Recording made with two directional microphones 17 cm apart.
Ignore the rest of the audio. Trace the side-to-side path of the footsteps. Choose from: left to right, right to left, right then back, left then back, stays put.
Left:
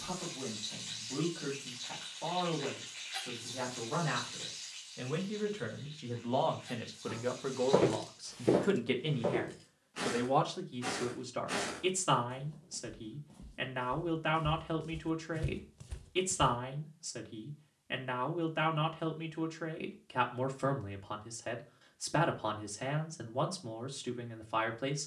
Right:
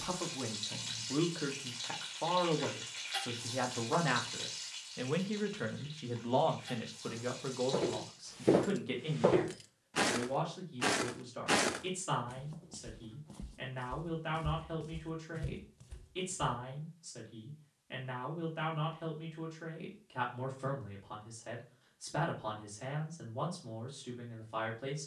right then back.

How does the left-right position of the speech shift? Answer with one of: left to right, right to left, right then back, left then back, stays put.
right to left.